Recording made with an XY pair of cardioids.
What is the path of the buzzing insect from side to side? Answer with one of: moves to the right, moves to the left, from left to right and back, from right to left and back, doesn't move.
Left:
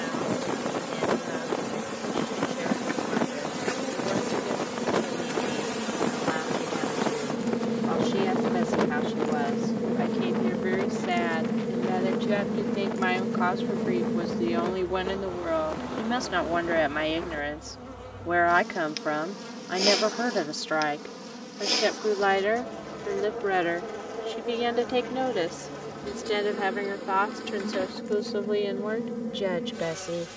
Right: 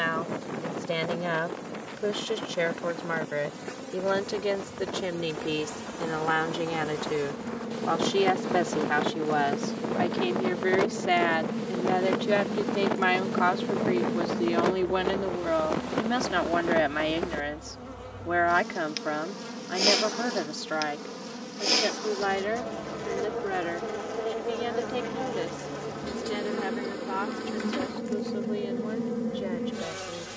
moves to the right.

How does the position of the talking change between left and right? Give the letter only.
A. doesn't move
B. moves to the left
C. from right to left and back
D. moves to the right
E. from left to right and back
B.